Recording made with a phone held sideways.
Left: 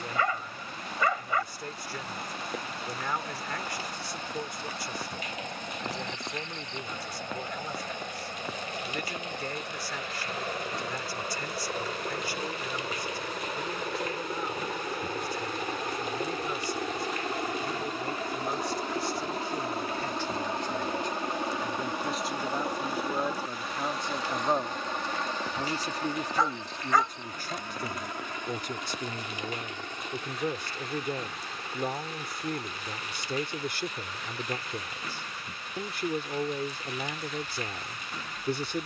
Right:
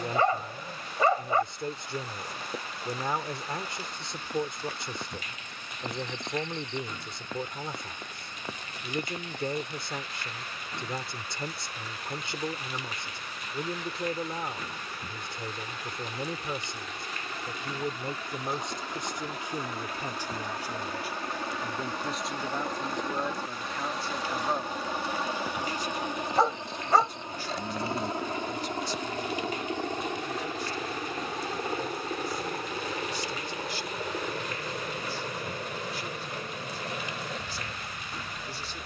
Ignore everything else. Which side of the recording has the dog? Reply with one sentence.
In this clip you hear the dog on the right.